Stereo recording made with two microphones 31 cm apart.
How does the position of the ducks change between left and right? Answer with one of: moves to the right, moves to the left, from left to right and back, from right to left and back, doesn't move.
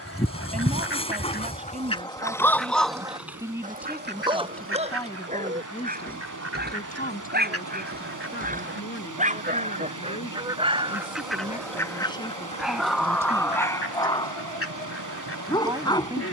from left to right and back.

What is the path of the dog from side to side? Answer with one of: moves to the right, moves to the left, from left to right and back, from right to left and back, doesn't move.
from left to right and back.